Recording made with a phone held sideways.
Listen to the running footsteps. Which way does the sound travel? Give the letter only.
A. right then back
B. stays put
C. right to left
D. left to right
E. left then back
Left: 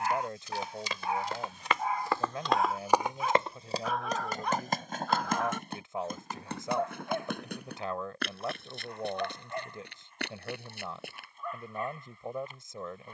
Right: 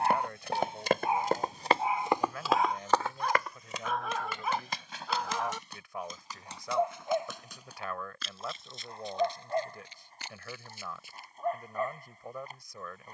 C.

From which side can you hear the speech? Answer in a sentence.
In this clip you hear the speech on the left.